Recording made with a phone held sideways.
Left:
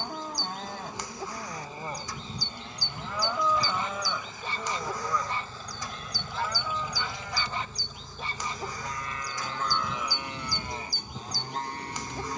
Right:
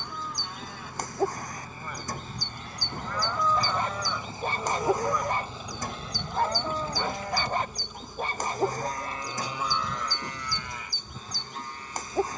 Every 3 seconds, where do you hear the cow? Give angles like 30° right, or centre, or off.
40° left, centre, 40° right, 20° left.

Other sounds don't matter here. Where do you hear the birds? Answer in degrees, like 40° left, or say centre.
50° right.